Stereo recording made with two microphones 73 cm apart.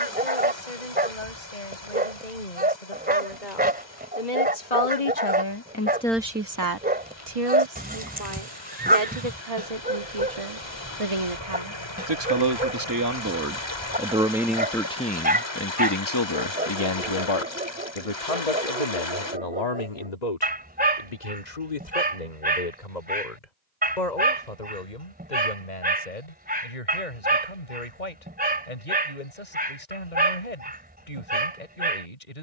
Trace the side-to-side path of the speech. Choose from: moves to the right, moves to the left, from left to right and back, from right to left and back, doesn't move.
from left to right and back.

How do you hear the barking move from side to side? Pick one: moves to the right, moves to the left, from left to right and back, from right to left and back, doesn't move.
doesn't move.